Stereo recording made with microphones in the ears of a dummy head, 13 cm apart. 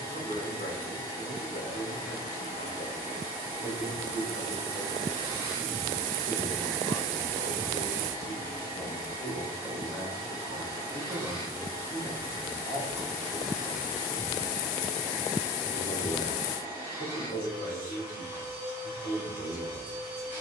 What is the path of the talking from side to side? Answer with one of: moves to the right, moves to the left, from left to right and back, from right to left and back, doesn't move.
from left to right and back.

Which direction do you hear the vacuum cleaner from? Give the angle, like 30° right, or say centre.
10° right.